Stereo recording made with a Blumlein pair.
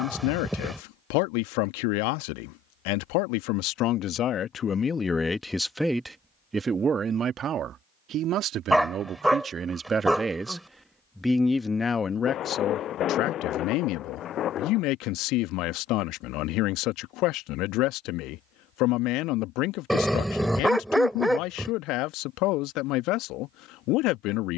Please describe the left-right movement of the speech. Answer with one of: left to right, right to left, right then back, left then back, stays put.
right then back.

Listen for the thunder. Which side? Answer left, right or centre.
left.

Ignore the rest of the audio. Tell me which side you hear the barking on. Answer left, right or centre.
centre.